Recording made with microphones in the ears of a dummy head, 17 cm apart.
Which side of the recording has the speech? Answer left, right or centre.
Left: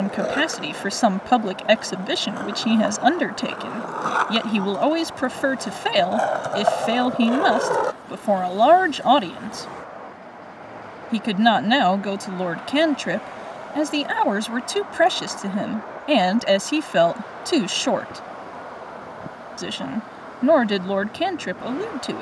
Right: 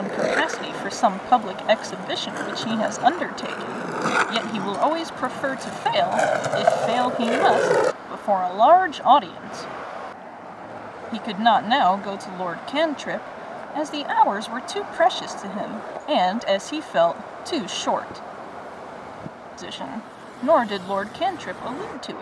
left.